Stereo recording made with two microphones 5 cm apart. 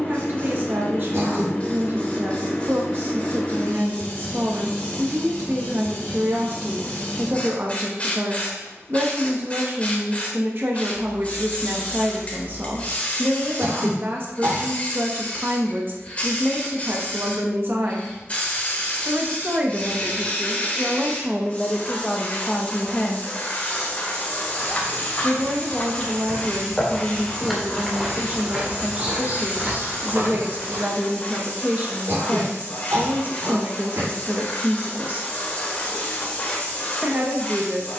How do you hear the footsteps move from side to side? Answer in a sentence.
You can hear the footsteps go from the left side to the right.